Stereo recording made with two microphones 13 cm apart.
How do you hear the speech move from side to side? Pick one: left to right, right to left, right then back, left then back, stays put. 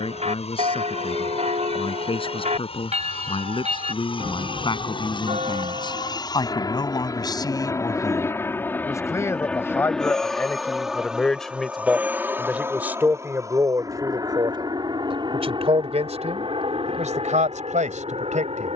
left to right.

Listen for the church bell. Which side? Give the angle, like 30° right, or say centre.
50° right.